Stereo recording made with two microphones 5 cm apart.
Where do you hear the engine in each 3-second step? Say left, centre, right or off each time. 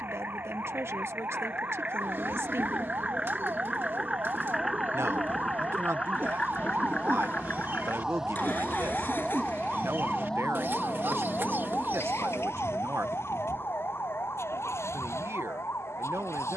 right, centre, left, left, left, left.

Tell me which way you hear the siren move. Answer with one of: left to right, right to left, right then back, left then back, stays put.
right to left.